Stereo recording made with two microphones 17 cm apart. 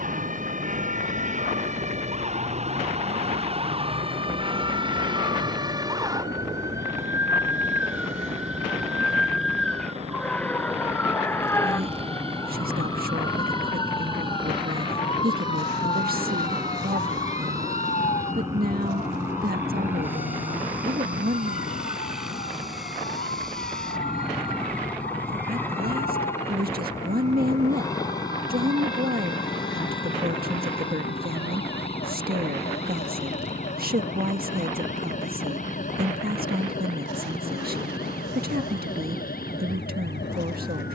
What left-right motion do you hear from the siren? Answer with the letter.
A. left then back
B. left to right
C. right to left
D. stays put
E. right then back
C.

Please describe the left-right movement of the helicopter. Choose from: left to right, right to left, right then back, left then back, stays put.
right to left.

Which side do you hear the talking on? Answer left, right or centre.
right.